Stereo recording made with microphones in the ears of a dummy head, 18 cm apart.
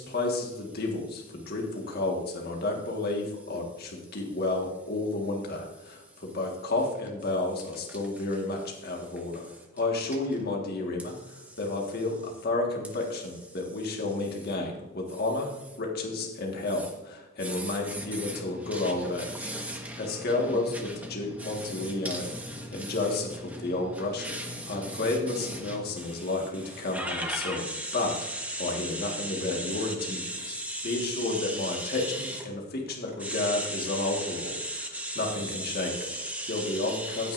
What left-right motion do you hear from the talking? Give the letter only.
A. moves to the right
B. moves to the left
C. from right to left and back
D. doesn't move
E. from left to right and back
D.